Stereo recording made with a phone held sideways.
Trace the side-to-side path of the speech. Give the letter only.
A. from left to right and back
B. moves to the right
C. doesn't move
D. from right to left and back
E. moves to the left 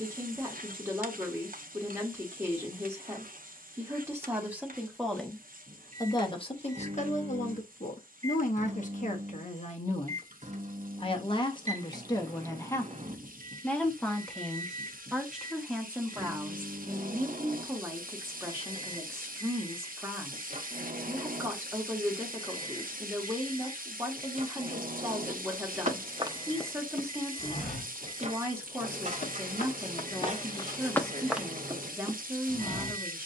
D.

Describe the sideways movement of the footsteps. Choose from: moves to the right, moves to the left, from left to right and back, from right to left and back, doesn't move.
from right to left and back.